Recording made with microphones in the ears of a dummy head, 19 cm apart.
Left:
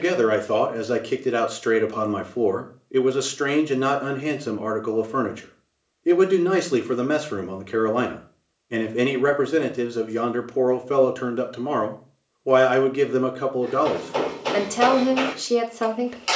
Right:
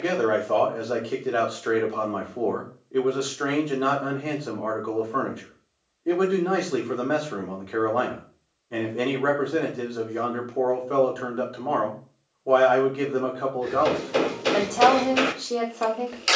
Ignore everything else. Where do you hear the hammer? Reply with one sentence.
You can hear the hammer on the right.